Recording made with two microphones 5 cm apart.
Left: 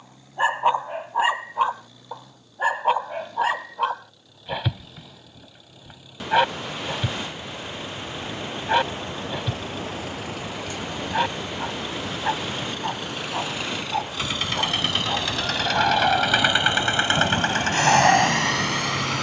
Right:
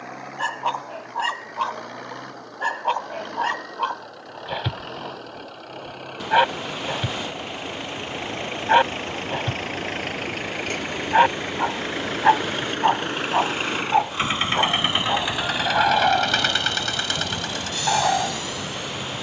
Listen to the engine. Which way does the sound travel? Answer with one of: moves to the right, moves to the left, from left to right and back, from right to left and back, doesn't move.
moves to the left.